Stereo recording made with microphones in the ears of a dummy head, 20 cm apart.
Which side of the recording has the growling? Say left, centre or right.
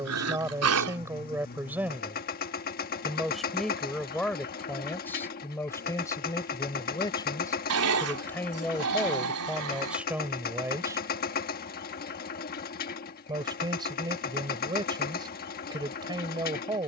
right.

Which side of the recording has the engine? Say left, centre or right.
left.